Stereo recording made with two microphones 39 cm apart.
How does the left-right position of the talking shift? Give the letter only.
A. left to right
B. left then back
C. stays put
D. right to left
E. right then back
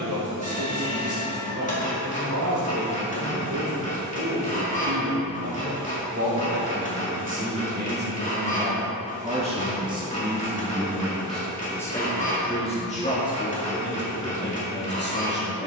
D.